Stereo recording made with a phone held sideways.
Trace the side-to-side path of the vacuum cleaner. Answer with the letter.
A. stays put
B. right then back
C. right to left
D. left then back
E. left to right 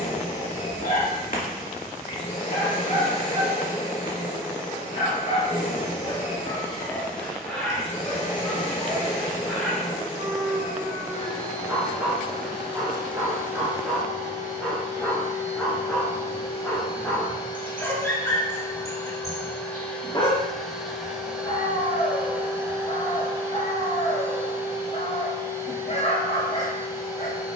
E.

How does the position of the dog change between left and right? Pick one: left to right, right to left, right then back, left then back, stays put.
right then back.